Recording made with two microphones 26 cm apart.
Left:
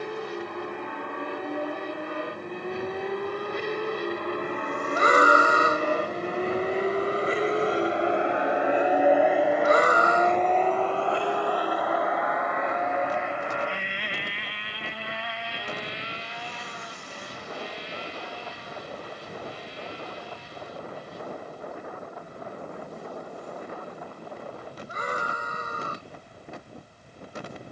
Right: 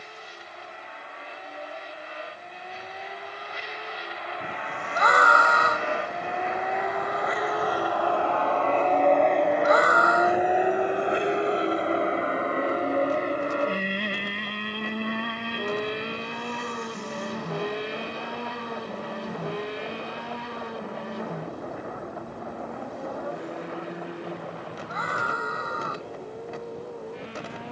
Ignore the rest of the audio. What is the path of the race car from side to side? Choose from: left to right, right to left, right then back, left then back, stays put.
left to right.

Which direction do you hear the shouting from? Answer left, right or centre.
left.